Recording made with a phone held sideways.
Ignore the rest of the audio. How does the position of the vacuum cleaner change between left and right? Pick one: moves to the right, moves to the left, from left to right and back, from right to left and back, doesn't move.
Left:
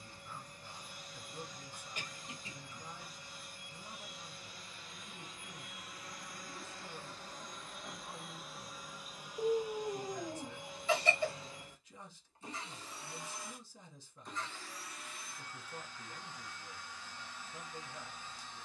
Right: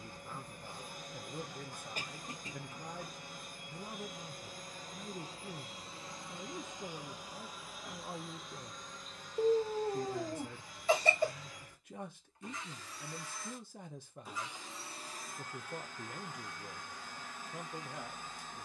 from right to left and back.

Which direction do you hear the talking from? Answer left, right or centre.
right.